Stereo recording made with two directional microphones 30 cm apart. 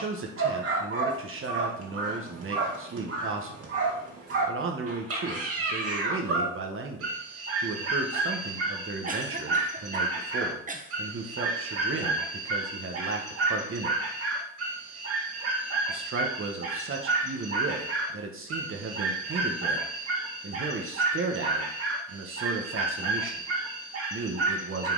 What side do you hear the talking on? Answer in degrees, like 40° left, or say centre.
40° right.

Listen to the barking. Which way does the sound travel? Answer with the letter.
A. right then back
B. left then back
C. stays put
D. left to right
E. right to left
C.